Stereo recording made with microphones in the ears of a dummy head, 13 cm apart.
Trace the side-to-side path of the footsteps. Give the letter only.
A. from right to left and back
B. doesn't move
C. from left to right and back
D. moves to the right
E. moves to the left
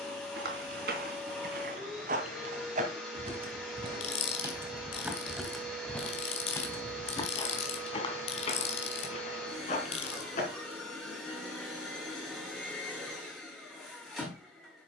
E.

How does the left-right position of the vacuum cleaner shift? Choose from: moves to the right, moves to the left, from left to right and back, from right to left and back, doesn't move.
doesn't move.